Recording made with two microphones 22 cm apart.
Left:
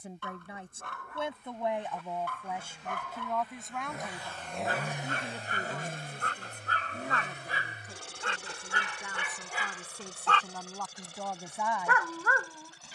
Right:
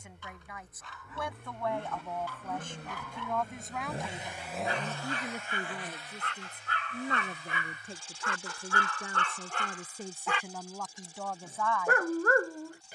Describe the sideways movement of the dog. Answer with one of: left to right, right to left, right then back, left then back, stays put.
left to right.